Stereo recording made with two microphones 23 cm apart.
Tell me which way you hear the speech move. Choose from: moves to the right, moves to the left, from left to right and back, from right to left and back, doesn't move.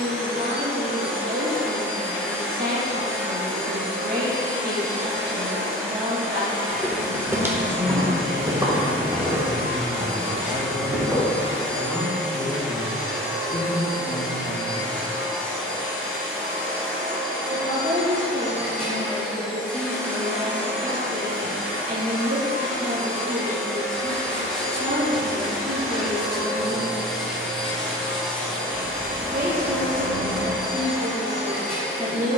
from right to left and back.